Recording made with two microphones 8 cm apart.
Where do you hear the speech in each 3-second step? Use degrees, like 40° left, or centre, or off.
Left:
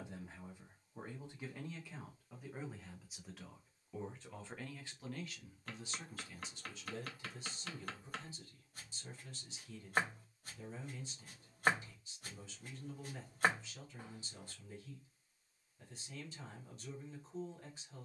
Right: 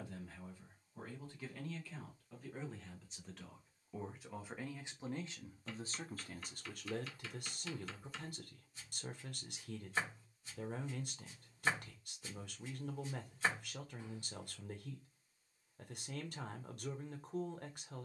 20° left, 10° right, 60° right, 60° right, 60° right, 60° right.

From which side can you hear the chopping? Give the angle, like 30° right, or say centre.
50° left.